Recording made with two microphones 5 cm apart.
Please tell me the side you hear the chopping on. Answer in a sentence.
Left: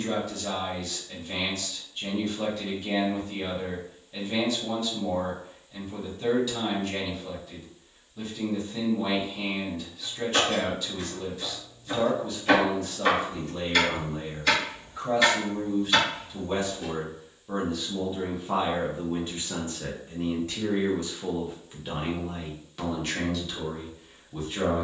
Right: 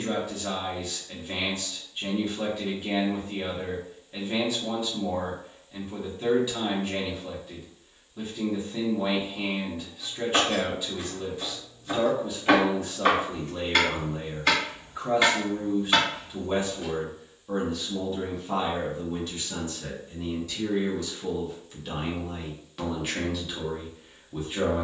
You can hear the chopping on the right.